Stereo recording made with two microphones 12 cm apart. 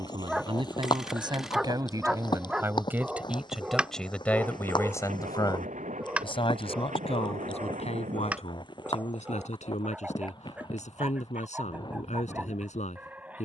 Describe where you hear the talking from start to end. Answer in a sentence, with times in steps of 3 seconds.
You can hear the talking on the right from 0 s, in the centre from 3 s and on the left from 6 s.